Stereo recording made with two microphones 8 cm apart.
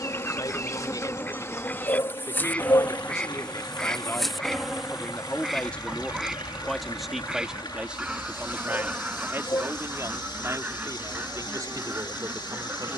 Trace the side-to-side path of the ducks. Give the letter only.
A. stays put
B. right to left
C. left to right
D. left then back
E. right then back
C.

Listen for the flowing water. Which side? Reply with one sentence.
In this clip you hear the flowing water on the left.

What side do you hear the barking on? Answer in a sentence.
You can hear the barking on the left.